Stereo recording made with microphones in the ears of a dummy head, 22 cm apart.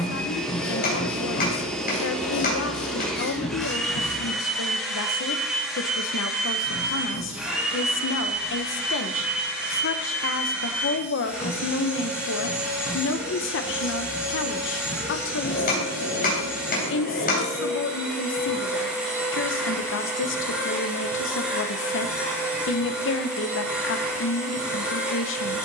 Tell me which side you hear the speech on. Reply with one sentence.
You can hear the speech on the left.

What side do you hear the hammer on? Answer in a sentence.
In this clip you hear the hammer on the left.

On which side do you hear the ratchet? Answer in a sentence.
You can hear the ratchet on the left.